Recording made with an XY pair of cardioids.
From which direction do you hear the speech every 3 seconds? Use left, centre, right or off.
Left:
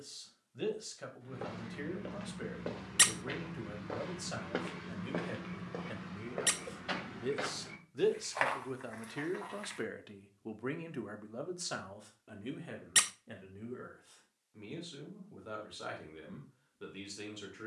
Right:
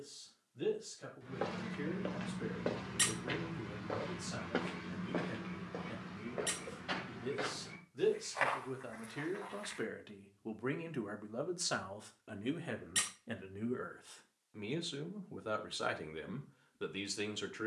left, left, left, centre, right, right.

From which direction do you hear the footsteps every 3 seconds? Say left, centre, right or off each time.
right, centre, left, left, off, off.